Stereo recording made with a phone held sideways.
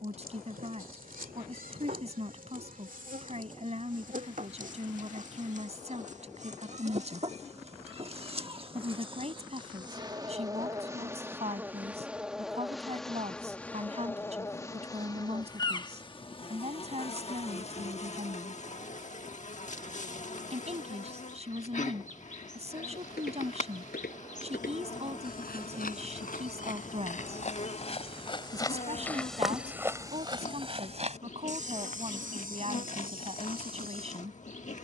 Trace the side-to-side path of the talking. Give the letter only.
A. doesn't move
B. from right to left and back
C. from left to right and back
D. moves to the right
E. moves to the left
A.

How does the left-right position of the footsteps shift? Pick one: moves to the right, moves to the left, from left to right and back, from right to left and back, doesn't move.
moves to the right.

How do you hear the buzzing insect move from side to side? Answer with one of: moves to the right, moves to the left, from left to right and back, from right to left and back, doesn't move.
moves to the left.